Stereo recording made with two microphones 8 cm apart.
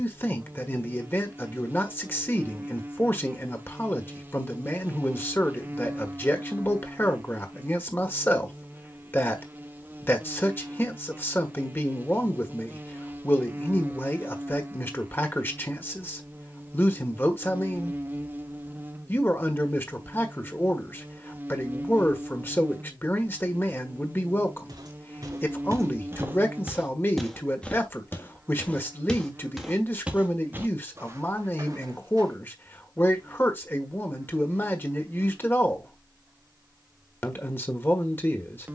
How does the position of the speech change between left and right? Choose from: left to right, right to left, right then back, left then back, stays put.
stays put.